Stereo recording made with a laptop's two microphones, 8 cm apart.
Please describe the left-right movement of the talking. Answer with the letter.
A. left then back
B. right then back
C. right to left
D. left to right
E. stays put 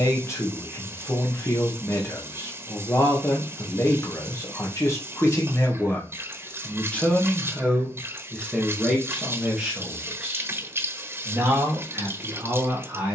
D.